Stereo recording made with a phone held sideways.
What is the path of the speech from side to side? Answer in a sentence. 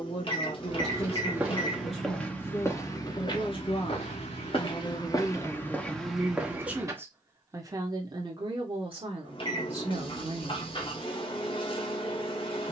You can hear the speech travel towards the right.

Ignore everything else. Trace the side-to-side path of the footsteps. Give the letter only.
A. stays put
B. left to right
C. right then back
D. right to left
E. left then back
E.